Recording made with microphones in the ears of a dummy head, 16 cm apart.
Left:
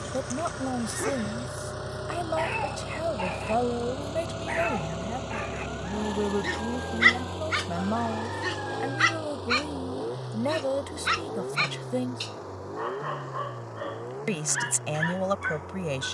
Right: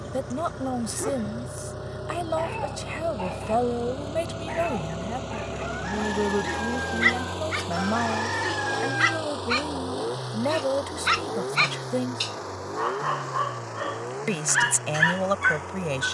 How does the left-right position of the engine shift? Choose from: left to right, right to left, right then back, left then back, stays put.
left to right.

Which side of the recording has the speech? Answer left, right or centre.
centre.